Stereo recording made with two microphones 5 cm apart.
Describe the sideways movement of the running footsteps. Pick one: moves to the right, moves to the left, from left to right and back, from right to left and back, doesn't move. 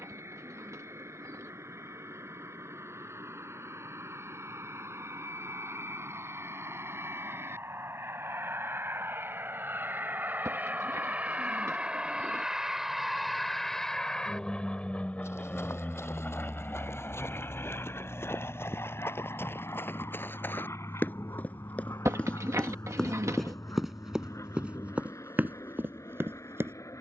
moves to the right.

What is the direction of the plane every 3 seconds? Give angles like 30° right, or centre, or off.
80° right, 70° right, 60° right, 40° right, centre, 40° left, 50° left, 60° left, 70° left.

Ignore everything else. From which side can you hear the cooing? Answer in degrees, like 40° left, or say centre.
80° right.